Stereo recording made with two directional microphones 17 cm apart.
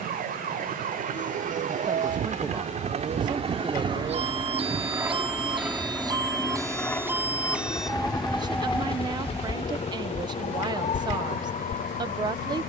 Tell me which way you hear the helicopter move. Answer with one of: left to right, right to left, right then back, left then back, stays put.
right to left.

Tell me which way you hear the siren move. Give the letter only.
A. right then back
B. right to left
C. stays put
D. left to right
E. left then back
B.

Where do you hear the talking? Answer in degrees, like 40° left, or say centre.
30° right.